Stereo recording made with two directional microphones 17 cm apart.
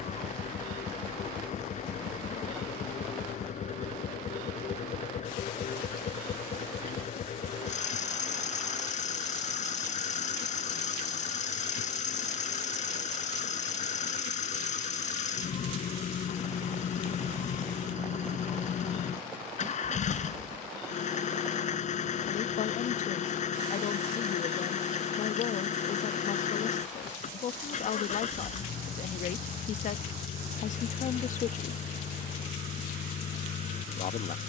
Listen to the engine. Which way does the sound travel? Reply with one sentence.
In this clip you hear the engine stay in one place.